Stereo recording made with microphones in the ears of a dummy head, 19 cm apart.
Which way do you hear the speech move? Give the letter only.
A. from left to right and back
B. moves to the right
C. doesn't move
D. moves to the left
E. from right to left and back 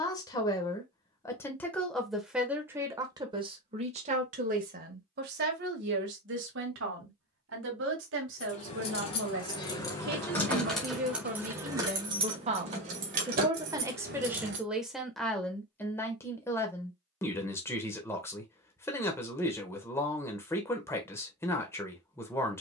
A.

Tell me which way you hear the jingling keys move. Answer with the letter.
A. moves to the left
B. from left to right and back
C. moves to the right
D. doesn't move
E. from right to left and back
C.